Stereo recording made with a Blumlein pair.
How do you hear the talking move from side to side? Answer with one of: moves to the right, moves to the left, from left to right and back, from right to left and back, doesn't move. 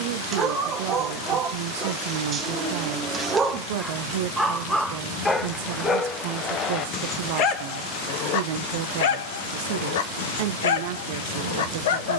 doesn't move.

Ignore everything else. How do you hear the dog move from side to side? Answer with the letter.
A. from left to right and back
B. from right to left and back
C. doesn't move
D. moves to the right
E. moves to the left
E.